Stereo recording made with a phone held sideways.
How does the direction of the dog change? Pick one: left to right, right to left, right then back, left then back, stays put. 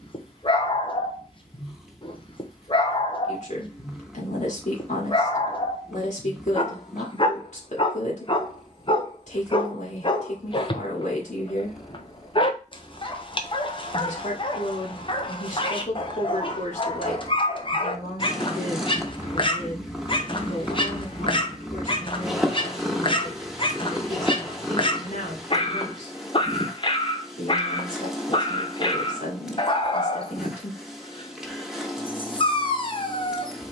stays put.